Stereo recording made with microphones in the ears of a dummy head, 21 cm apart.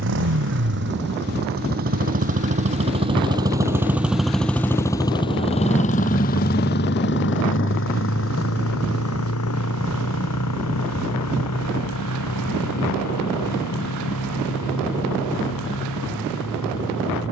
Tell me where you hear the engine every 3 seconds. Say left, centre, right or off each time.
right, centre, left, left, left, left.